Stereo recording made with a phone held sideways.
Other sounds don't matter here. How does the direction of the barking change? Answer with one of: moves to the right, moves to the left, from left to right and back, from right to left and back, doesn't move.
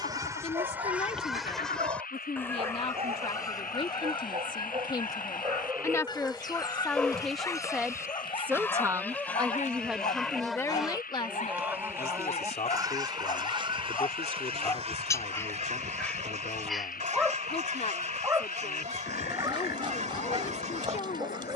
from right to left and back.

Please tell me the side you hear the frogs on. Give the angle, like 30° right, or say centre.
80° left.